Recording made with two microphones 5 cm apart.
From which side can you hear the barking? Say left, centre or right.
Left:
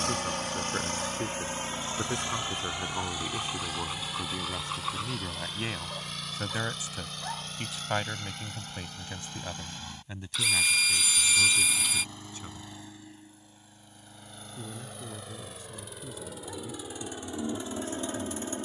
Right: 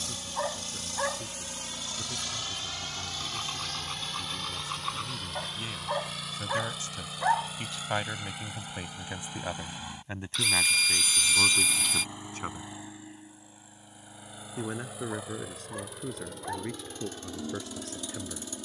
right.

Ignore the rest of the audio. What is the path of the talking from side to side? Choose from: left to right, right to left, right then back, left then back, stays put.
left to right.